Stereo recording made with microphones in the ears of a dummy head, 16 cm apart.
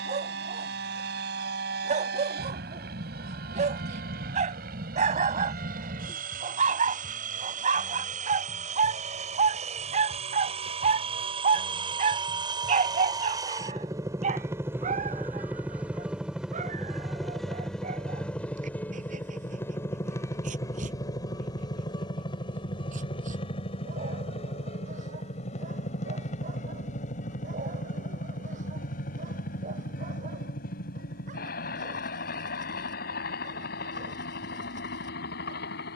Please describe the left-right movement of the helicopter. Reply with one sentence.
In this clip you hear the helicopter travel towards the left.